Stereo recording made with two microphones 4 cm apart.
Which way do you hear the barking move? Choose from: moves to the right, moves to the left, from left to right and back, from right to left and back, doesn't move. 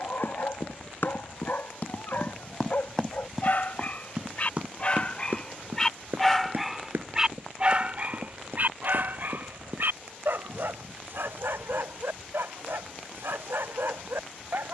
moves to the right.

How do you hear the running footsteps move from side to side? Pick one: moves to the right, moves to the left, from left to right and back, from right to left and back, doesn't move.
moves to the right.